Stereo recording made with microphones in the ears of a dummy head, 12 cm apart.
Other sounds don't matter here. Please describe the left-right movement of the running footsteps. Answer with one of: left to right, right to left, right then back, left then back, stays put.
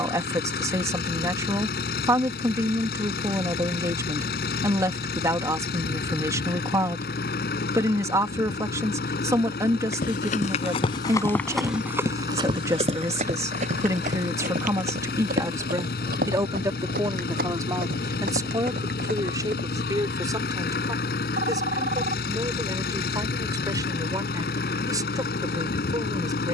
left to right.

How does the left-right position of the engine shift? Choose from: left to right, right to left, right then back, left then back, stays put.
stays put.